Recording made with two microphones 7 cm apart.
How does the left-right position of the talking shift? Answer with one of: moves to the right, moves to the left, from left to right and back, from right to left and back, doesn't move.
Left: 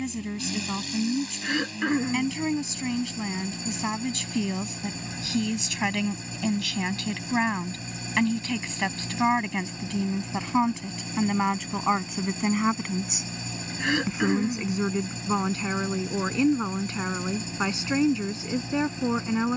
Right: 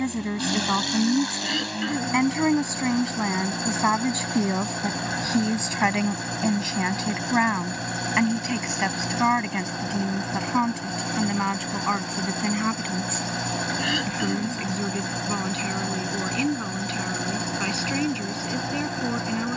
moves to the left.